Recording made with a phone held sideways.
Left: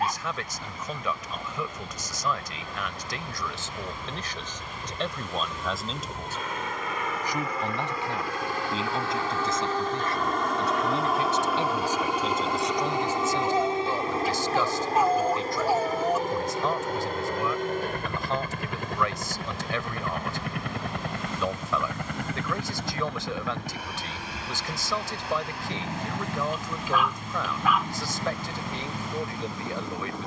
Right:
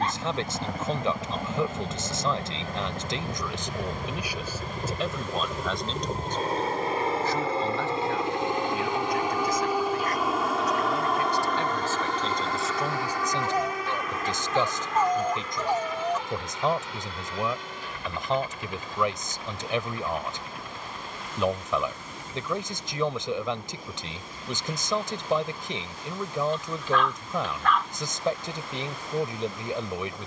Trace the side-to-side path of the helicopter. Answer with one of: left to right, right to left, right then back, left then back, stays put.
right to left.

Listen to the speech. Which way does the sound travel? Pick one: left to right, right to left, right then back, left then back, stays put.
left then back.